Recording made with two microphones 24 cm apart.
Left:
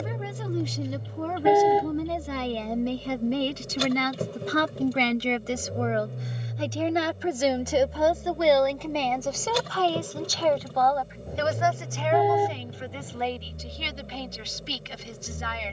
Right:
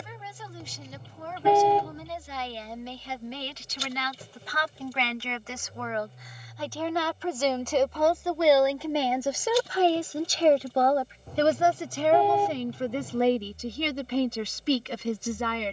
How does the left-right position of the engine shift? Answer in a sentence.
You can hear the engine stay in one place.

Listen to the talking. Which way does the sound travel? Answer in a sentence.
You can hear the talking move from left to right.